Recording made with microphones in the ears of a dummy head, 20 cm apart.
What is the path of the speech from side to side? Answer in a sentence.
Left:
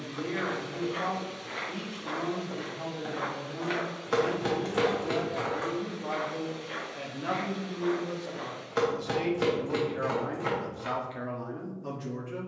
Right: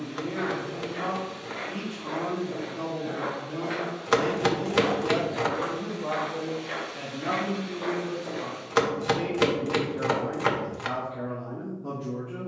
You can hear the speech move from left to right and back again.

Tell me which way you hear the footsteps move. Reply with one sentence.
In this clip you hear the footsteps move from left to right.